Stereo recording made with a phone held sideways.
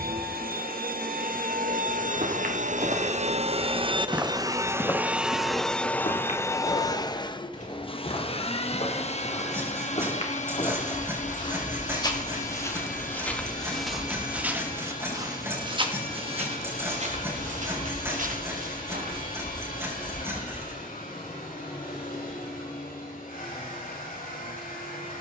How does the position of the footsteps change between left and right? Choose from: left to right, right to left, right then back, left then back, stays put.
left then back.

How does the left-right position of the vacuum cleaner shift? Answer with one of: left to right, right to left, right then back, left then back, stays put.
right to left.